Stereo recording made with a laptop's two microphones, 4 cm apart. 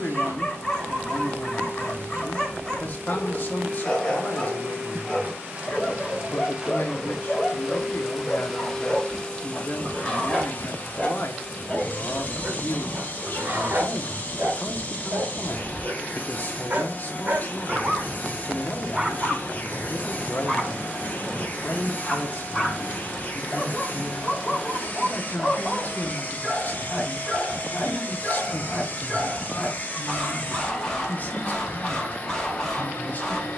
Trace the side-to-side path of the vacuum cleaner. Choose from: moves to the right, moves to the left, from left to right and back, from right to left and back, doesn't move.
moves to the left.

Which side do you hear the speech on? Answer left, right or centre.
left.